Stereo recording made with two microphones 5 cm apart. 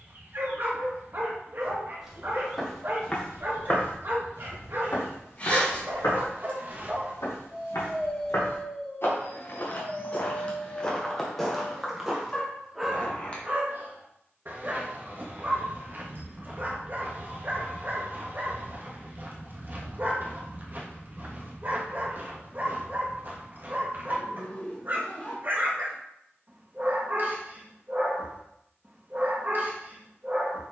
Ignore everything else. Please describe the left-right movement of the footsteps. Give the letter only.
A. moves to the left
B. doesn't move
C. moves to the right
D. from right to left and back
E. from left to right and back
D.